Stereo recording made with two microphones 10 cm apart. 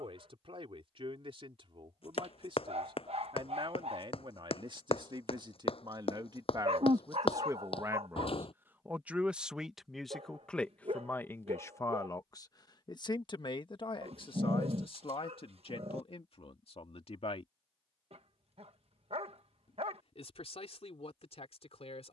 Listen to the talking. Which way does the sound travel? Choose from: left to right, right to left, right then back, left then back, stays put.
right to left.